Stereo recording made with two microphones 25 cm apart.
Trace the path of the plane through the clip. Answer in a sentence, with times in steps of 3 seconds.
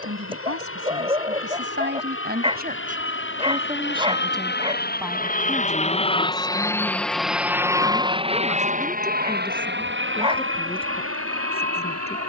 You can hear the plane on the left from 0 s, in the centre from 6 s and on the right from 9 s.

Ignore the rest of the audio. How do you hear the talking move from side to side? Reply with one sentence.
In this clip you hear the talking go from the right side to the left.